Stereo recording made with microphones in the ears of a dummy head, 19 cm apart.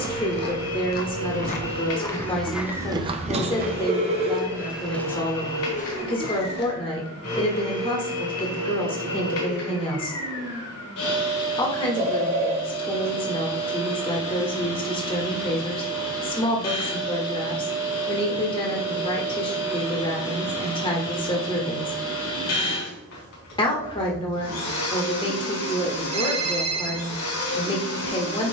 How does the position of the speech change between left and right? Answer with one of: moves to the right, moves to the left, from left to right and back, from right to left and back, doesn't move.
doesn't move.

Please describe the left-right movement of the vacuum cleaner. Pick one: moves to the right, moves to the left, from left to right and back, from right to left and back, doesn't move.
doesn't move.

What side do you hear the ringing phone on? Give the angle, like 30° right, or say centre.
30° right.